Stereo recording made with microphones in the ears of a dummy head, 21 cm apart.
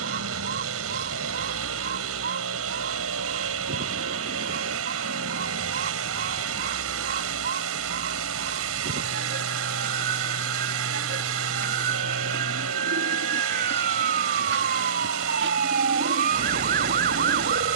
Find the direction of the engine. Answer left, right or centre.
right.